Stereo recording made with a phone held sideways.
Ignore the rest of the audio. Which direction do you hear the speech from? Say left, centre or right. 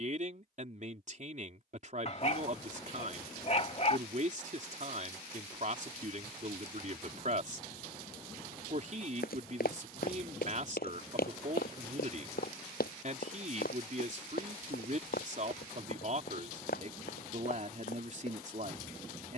right.